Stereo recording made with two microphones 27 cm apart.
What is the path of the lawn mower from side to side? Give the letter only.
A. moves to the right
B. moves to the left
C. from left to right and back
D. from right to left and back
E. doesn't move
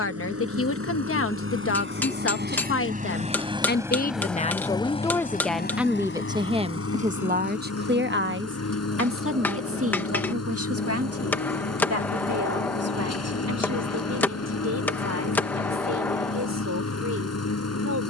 B.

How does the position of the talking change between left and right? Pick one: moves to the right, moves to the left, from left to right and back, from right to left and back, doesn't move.
moves to the right.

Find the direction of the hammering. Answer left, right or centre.
centre.